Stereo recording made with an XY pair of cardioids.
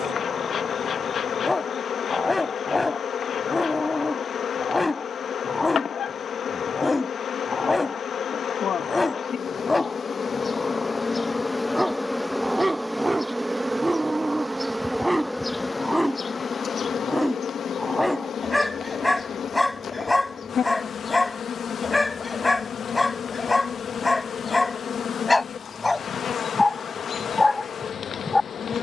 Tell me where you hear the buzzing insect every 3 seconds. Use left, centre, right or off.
left, left, left, left, centre, left, left, left, left, left.